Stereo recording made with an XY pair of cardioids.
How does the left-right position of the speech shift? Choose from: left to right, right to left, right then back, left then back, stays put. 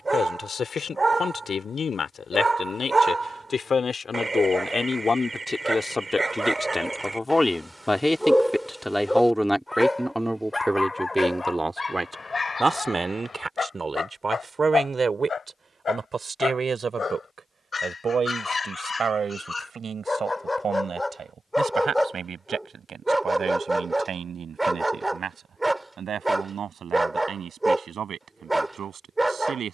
left to right.